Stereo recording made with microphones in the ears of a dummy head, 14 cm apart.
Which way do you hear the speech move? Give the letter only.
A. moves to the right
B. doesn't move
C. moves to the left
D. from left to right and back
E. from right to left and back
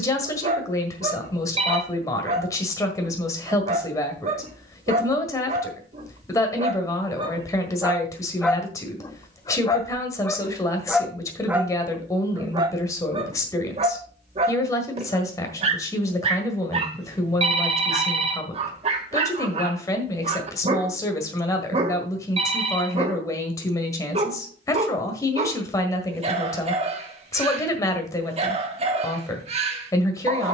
B.